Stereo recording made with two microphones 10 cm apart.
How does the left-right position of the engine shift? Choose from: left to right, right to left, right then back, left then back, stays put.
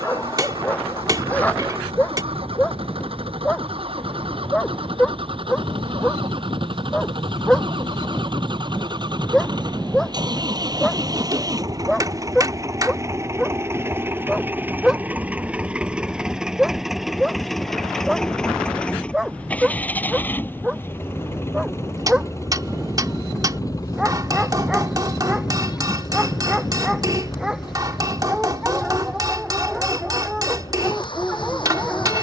right to left.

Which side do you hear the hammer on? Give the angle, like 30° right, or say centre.
40° right.